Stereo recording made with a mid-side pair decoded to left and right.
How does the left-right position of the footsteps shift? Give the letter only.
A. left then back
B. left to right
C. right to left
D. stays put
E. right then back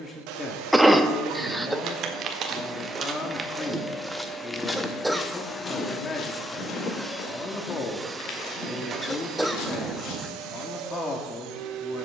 C.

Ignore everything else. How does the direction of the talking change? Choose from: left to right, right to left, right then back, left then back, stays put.
stays put.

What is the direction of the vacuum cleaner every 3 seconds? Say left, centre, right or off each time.
right, centre, centre, right.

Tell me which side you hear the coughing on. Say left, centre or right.
centre.